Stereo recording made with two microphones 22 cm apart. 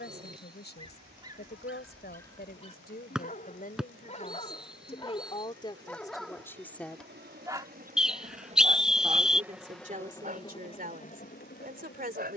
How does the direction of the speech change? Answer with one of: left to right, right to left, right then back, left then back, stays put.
left to right.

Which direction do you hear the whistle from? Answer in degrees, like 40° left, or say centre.
centre.